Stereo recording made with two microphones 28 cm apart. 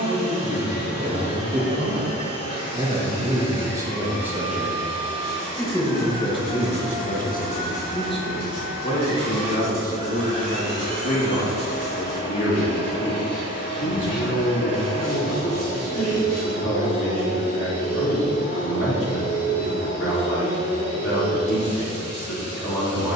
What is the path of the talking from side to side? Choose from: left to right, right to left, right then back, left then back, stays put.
right to left.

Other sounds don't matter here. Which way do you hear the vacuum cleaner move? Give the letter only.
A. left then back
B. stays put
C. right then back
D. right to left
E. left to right
B.